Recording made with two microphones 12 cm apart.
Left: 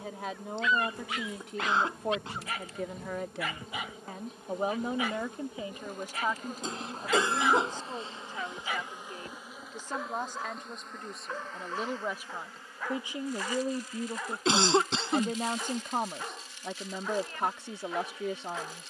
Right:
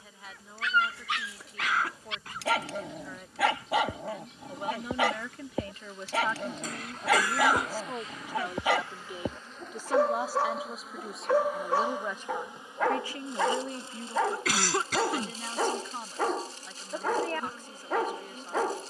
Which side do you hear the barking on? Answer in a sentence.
You can hear the barking on the right.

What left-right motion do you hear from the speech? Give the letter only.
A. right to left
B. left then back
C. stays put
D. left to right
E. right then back
E.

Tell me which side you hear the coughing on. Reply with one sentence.
In this clip you hear the coughing on the left.